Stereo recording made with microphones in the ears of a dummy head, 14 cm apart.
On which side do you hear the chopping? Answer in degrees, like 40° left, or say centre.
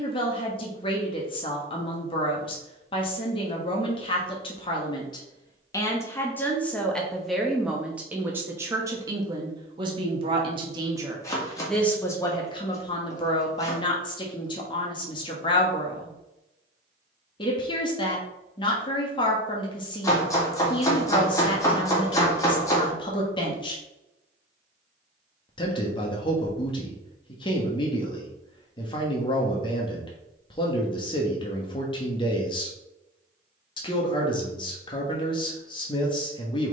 20° left.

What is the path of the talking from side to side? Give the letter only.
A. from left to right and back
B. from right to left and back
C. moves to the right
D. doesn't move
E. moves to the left
A.